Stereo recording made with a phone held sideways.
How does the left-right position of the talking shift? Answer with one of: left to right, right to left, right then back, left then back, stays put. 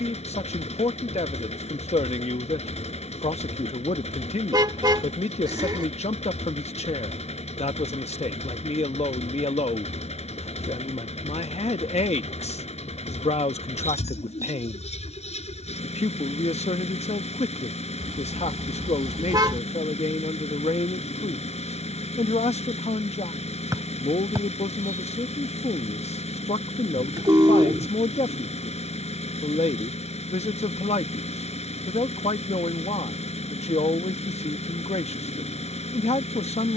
stays put.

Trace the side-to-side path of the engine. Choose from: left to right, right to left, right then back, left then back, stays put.
stays put.